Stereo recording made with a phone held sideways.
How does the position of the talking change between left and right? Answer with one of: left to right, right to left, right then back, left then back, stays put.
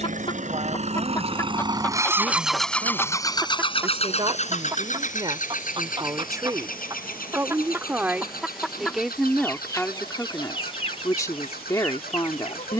right to left.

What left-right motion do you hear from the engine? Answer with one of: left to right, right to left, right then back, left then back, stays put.
right to left.